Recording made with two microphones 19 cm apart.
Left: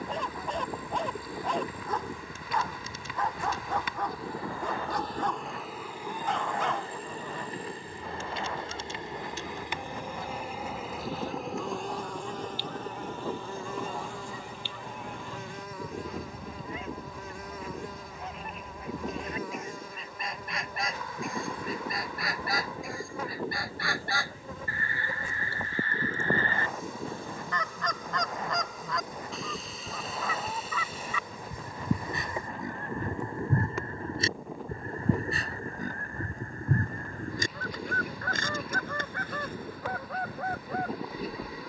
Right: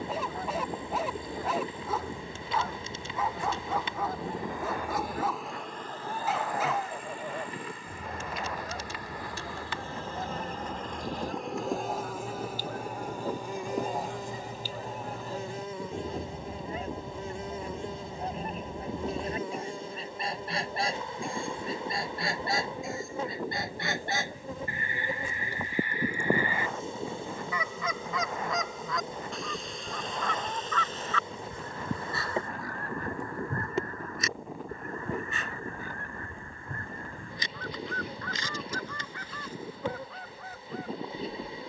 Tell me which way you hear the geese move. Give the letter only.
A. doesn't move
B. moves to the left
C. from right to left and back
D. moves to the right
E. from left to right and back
B.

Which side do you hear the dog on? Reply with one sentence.
In this clip you hear the dog in the centre.